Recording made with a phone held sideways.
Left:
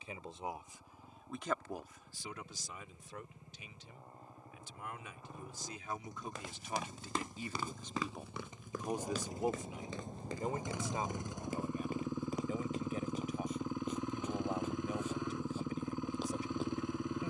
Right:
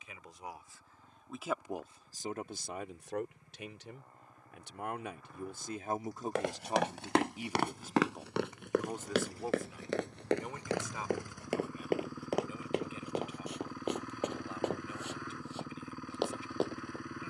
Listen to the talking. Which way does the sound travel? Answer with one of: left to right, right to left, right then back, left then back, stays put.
right then back.